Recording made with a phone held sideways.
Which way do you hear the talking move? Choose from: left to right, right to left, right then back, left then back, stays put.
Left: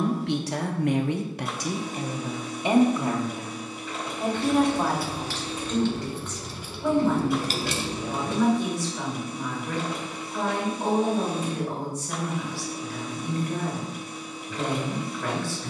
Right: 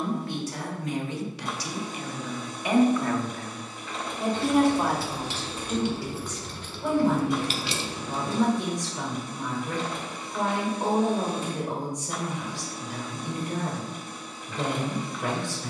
left to right.